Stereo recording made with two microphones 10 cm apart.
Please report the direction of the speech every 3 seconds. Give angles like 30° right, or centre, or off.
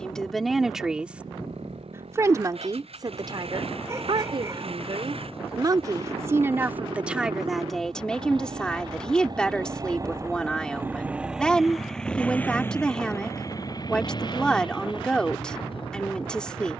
10° right, 50° right, 10° right, 10° left, 10° left, 10° left.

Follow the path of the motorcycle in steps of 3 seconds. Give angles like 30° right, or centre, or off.
80° right, 70° right, 60° right, 20° right, 30° left, 60° left.